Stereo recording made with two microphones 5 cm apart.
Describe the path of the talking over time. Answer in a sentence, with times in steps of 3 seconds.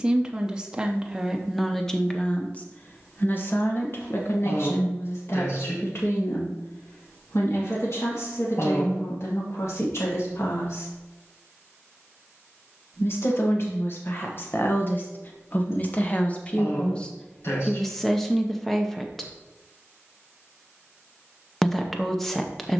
In this clip you hear the talking in the centre from 0 s, on the left from 3 s and in the centre from 18 s.